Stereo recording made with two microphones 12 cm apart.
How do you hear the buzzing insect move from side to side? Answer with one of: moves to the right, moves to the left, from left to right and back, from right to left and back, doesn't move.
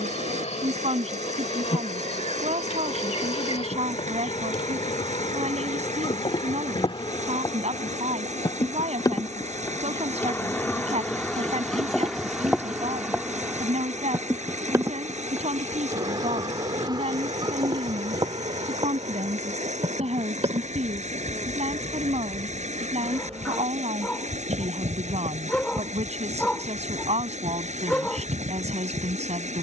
moves to the right.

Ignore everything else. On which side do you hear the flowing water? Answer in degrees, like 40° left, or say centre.
80° right.